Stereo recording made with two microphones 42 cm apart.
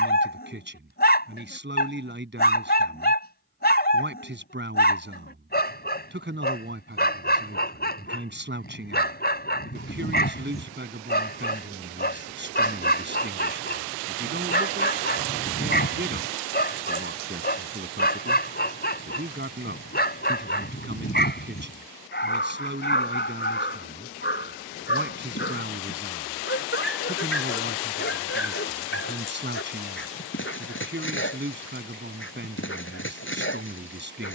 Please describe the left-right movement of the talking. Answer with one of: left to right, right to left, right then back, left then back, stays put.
stays put.